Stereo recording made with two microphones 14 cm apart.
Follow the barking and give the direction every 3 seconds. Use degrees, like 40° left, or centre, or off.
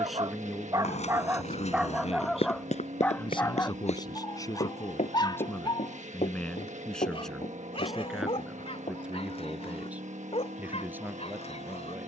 10° right, 30° left, 40° left, 50° left.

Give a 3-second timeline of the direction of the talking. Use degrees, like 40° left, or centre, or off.
30° left, 30° left, centre, 10° right.